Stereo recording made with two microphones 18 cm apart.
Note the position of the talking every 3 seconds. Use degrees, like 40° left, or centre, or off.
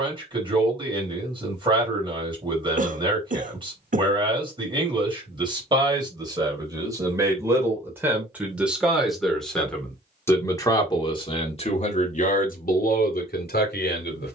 30° right, 30° right, 10° right, 20° left, 60° left.